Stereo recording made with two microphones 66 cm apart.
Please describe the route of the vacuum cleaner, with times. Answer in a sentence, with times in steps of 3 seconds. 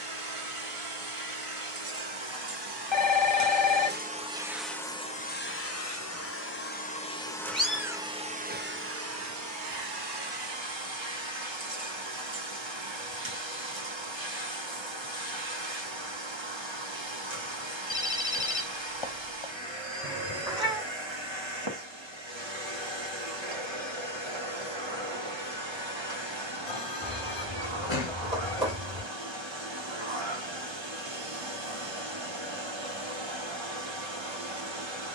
You can hear the vacuum cleaner on the right from 0 s, in the centre from 3 s and on the right from 9 s.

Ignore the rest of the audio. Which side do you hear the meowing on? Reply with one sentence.
You can hear the meowing in the centre.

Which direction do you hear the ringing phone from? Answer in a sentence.
You can hear the ringing phone on the left.